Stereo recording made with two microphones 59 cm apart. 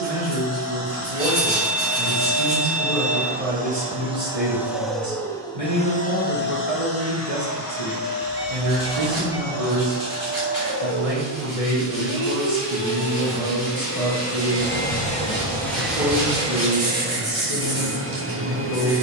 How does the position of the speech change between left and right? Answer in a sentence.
You can hear the speech stay put.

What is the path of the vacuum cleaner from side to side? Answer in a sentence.
You can hear the vacuum cleaner move from right to left and back again.